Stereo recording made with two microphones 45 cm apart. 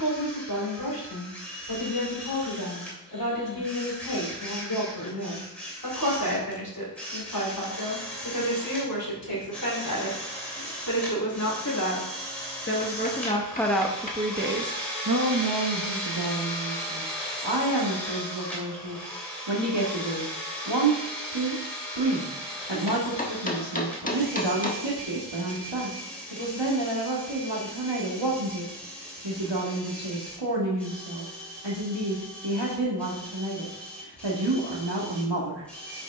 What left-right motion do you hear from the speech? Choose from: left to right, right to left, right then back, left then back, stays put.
left to right.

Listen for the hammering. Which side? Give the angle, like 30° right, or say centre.
20° left.